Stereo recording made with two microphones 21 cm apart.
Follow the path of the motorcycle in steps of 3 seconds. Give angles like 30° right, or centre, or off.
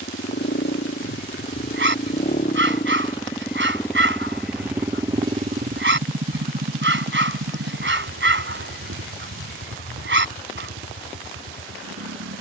50° left, centre, 60° right, 70° right.